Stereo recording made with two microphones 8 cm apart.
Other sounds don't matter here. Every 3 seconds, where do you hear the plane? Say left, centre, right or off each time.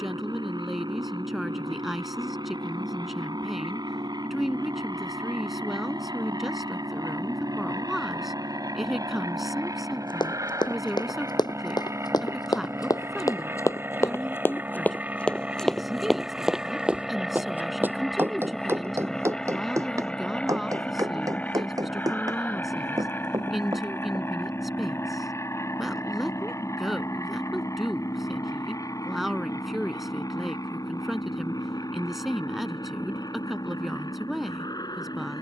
right, right, right, right, right, centre, centre, left, left, left, left, left.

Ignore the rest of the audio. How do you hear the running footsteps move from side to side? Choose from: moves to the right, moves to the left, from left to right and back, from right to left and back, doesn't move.
moves to the right.